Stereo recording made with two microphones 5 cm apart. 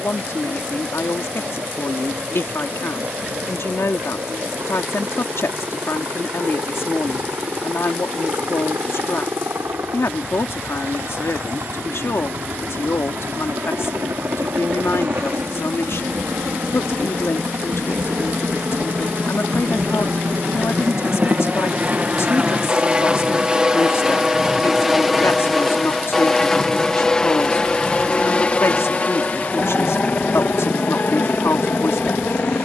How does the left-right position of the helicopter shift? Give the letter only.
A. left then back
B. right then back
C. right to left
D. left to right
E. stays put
C.